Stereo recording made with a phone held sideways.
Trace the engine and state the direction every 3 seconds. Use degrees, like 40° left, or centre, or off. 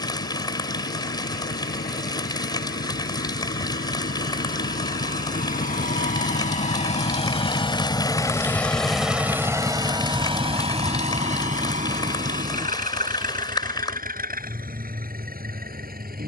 80° left, 70° left, 30° left, 40° right, 60° right, 70° right.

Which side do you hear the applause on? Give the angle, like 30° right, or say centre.
30° left.